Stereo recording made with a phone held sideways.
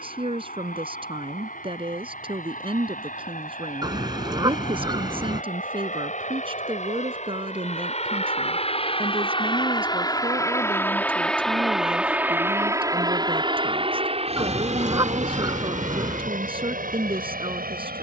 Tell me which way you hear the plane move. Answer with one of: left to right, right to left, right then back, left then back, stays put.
left to right.